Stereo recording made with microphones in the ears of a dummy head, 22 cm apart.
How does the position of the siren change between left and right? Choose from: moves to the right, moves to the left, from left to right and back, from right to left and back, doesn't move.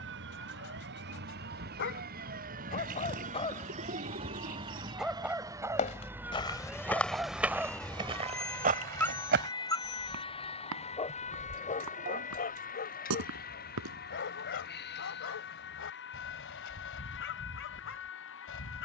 moves to the left.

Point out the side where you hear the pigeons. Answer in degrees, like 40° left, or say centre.
40° right.